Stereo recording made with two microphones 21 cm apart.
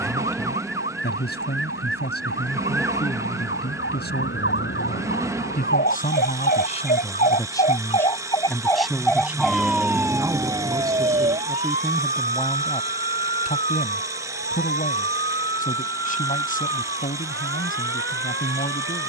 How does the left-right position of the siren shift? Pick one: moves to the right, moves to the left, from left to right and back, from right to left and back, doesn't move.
moves to the right.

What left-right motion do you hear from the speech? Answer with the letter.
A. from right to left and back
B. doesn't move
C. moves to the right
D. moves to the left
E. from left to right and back
E.